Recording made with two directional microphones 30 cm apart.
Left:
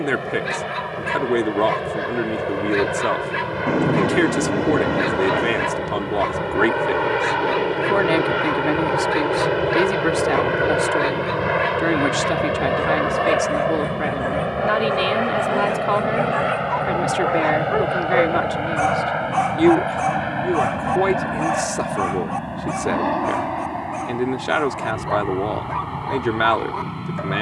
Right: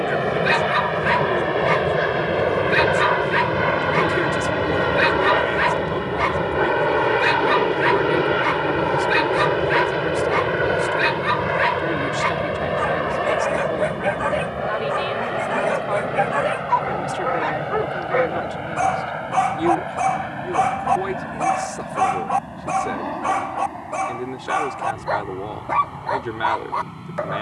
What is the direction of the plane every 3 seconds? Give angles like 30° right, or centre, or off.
40° right, 30° right, 10° right, 10° left, 20° left, 30° left, 40° left, 40° left, 50° left.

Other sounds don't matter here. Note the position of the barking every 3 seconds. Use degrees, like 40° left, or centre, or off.
50° right, 50° right, 50° right, 50° right, 50° right, 20° right, 10° right, 30° right, 40° right.